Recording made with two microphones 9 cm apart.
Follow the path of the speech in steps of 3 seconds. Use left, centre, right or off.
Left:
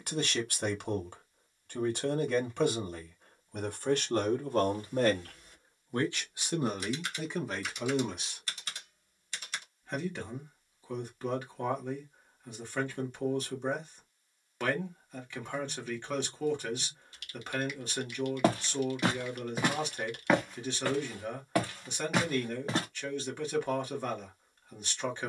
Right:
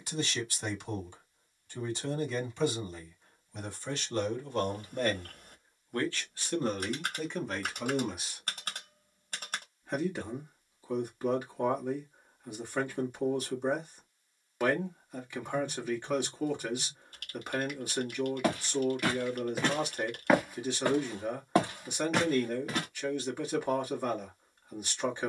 left, left, centre, centre, centre, centre, centre, centre, centre.